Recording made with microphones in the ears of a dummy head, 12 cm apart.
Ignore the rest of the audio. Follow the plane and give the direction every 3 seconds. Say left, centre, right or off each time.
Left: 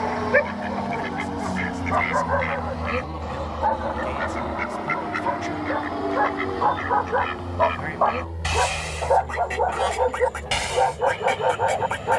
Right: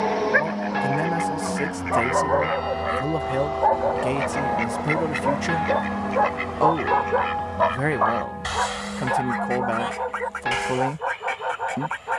centre, left, left, left.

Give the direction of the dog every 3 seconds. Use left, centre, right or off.
centre, right, centre, left.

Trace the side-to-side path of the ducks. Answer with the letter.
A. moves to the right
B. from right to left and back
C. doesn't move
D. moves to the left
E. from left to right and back
E.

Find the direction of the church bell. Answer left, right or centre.
right.